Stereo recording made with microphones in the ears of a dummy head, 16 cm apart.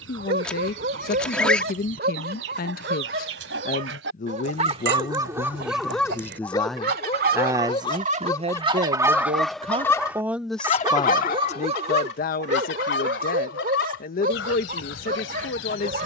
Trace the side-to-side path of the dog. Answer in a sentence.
In this clip you hear the dog go left and come back.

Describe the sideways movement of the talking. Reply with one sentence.
You can hear the talking move from left to right and back again.